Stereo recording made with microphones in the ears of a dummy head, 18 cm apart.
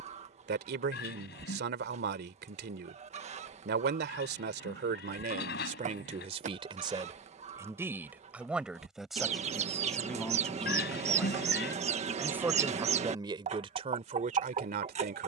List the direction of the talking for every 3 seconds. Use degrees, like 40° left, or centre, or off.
60° right, 50° right, 20° right, centre, 30° right.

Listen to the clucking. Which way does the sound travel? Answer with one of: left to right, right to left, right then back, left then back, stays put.
stays put.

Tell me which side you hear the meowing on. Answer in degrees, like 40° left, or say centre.
50° left.